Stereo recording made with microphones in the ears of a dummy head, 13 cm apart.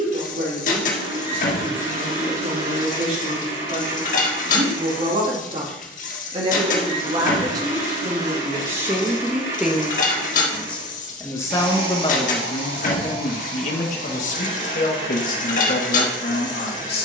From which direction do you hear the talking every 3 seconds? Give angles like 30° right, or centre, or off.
50° right, 40° right, 30° right, 10° left, 50° left, 70° left.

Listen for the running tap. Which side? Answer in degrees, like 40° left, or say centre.
60° left.